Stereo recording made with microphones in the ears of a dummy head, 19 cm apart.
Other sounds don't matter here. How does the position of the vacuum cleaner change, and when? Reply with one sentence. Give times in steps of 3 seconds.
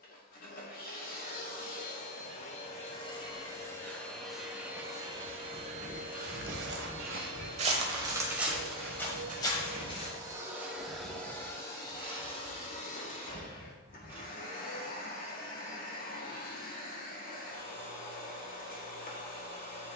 You can hear the vacuum cleaner on the left from 0 s, in the centre from 3 s, on the right from 6 s, in the centre from 9 s and on the left from 12 s.